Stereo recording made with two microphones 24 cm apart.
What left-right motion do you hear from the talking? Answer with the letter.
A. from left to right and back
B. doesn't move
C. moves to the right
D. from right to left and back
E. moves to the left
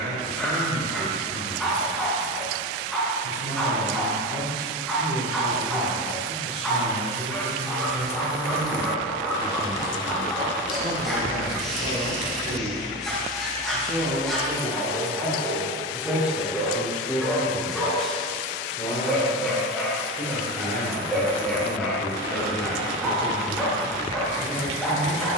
E.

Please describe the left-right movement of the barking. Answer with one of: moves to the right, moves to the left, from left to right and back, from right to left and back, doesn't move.
doesn't move.